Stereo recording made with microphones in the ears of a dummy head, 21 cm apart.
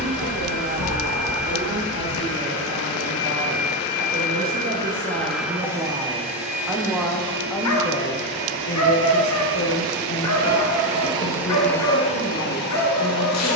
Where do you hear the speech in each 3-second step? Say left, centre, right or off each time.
right, right, centre, left, left.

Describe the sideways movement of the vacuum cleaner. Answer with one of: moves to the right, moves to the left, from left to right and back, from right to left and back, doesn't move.
from left to right and back.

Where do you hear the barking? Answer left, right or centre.
left.